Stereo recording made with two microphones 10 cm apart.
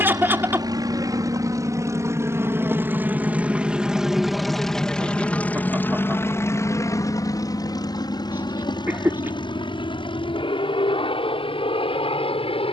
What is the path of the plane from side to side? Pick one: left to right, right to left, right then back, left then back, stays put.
right to left.